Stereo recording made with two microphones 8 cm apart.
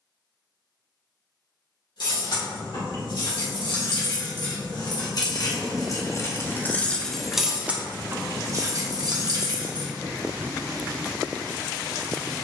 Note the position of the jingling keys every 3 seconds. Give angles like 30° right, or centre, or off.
70° left, 60° left, 10° right, 50° right.